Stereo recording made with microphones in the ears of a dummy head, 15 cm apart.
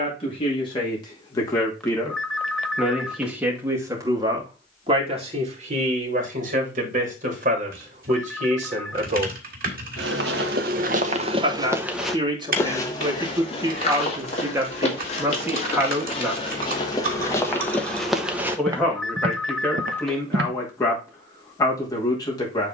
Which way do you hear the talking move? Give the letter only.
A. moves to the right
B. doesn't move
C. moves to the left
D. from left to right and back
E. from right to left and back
D.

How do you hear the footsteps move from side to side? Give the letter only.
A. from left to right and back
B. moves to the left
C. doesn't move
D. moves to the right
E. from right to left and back
E.